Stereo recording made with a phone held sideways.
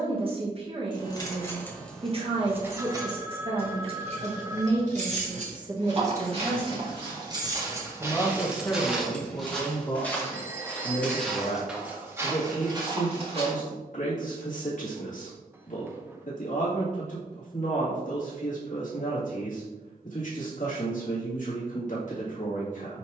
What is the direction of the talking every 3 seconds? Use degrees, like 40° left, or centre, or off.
40° right, 30° right, centre, 40° left, 50° left, 50° left, 50° left, 50° left.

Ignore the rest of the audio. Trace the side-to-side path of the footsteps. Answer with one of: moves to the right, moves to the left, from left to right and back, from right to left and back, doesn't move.
from right to left and back.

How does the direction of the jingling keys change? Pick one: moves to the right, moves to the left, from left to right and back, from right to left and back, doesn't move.
from left to right and back.